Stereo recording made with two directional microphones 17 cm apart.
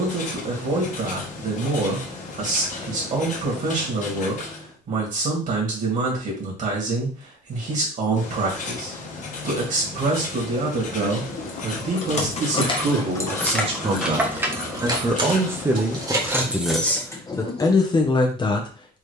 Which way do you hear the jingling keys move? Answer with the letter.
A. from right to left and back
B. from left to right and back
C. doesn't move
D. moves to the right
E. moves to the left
B.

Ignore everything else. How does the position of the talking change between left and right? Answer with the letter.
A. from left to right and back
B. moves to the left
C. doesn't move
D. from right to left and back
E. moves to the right
B.